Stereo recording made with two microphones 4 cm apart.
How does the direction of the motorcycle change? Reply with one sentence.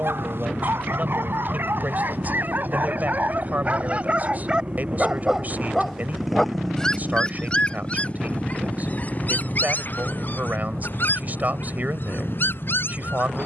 In this clip you hear the motorcycle travel towards the left.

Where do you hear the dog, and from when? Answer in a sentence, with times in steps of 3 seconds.
In this clip you hear the dog on the right from 0 s and on the left from 6 s.